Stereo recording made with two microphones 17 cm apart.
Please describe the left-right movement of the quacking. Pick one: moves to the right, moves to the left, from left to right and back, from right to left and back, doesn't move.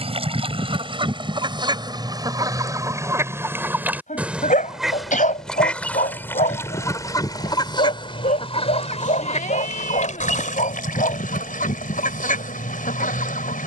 moves to the left.